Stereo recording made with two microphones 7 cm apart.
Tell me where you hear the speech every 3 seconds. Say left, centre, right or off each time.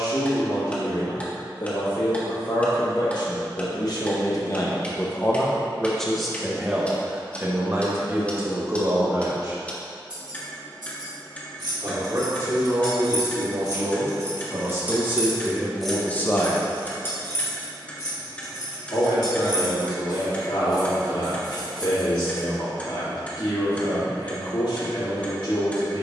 left, left, right, right, right, centre, left, left, left.